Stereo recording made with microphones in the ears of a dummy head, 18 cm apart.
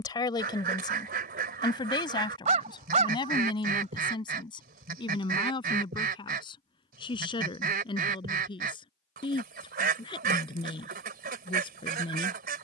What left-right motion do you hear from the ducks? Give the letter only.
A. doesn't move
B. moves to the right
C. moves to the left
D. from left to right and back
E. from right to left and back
A.